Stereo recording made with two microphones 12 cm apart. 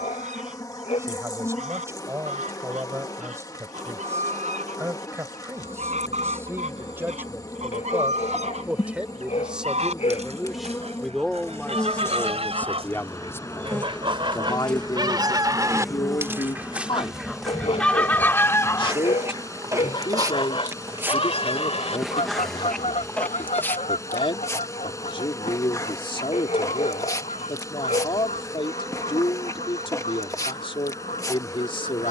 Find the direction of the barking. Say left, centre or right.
left.